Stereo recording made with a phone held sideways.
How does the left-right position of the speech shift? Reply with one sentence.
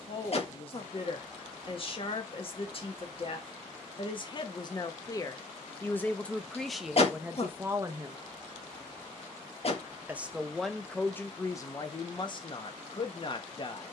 In this clip you hear the speech go right and come back.